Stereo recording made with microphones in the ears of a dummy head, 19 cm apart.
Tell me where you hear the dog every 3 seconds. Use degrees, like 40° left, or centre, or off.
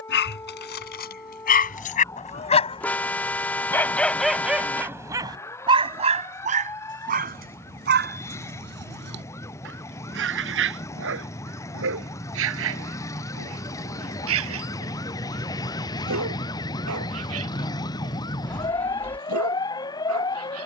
40° left, 10° right, 50° right, 60° right, 70° right, 70° right, 80° right.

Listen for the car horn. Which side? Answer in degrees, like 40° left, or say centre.
10° left.